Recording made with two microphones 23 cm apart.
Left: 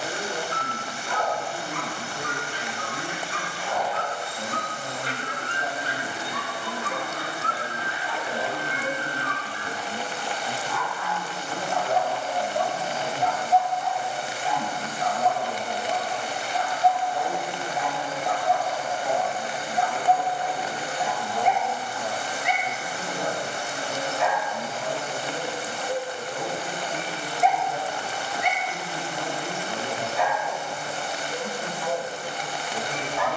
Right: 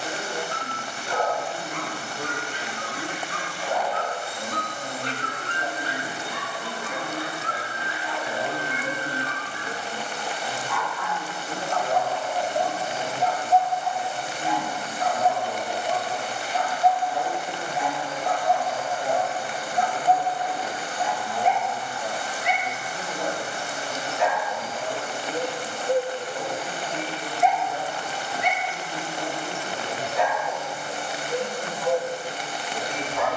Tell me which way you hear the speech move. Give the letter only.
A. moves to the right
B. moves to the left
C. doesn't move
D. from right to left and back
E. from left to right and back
E.